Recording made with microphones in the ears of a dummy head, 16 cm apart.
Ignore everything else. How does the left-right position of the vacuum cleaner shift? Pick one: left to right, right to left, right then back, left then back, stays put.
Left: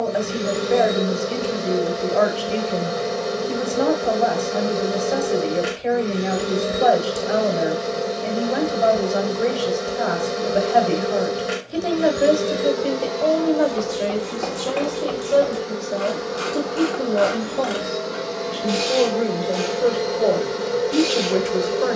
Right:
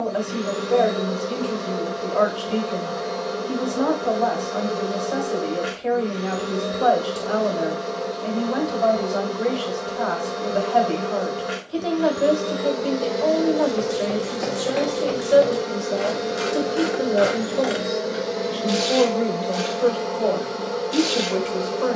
right then back.